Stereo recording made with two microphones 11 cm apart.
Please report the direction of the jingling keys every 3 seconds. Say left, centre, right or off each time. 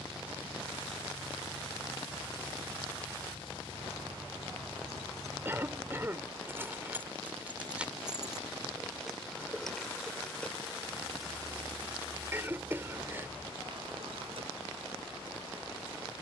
right, right, centre, centre, right, off.